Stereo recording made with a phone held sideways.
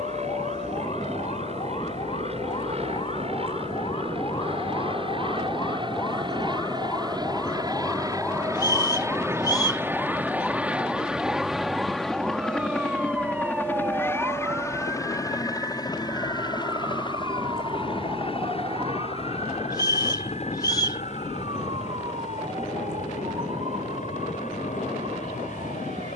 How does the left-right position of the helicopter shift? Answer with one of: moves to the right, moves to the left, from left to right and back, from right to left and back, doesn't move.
moves to the left.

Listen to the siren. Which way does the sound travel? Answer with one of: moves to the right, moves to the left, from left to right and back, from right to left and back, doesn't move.
moves to the right.